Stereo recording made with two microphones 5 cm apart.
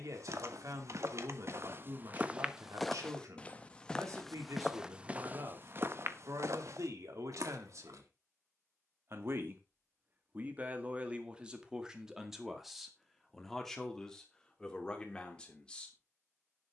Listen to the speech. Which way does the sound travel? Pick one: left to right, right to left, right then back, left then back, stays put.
right to left.